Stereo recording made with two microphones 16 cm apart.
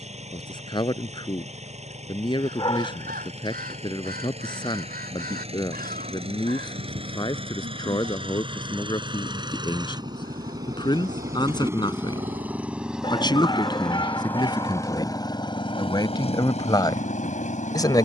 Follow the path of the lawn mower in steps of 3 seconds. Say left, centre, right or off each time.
right, right, right, right, centre, left.